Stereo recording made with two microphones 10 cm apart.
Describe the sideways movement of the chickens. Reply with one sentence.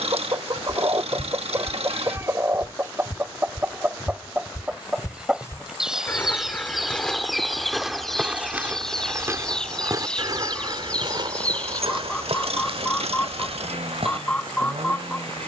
In this clip you hear the chickens travel towards the left.